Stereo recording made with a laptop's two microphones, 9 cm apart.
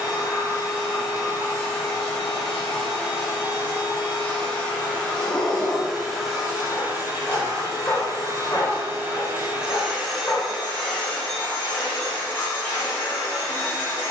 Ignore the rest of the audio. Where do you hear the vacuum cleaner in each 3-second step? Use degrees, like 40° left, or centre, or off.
30° left, 20° left, 30° right, centre, 30° left.